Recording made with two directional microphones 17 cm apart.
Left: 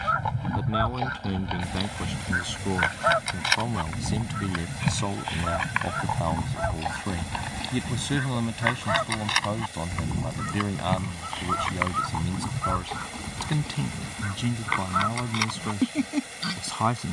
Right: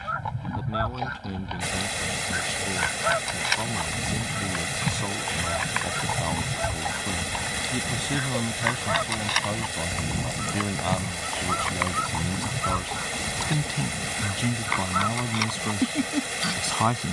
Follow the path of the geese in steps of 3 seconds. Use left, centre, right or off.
left, left, centre, centre, centre, centre.